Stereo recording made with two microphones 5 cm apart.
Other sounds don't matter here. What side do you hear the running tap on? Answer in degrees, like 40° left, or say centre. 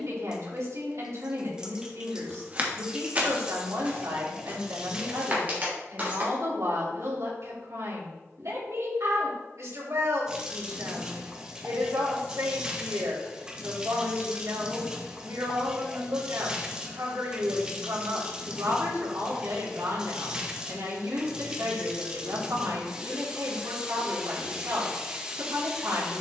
20° right.